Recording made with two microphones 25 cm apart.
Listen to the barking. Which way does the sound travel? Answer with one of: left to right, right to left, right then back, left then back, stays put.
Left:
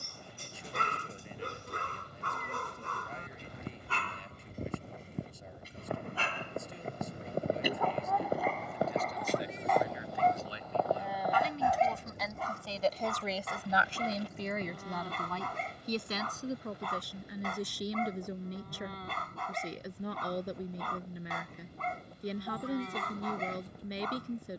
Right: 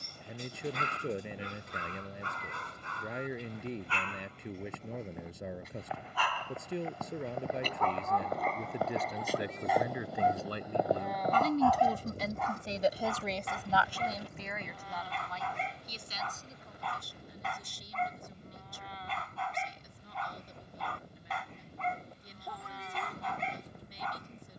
right then back.